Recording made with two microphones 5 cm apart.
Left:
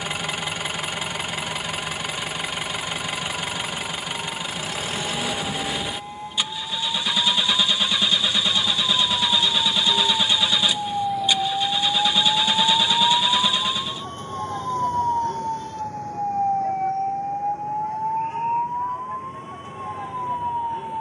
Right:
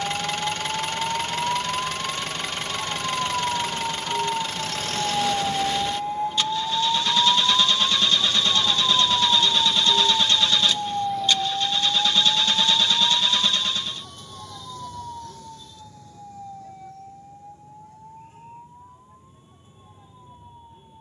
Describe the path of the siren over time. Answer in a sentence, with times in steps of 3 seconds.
In this clip you hear the siren on the right from 0 s, in the centre from 9 s and on the left from 12 s.